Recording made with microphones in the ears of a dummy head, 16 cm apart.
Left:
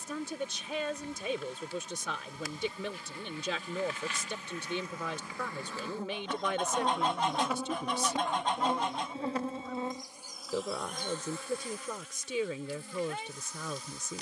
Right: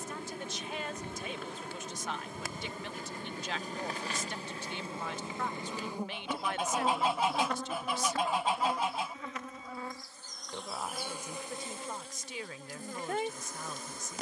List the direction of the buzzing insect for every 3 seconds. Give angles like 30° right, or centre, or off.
50° right, 30° right, 10° left, centre, 40° right.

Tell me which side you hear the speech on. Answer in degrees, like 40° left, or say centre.
80° left.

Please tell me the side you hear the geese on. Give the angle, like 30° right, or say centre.
10° right.